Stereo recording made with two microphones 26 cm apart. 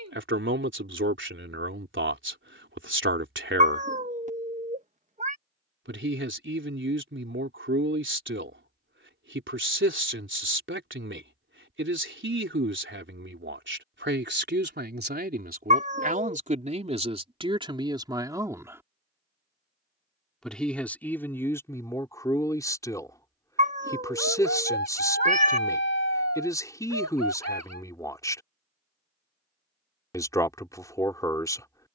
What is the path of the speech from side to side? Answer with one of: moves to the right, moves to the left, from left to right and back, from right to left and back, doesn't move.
moves to the left.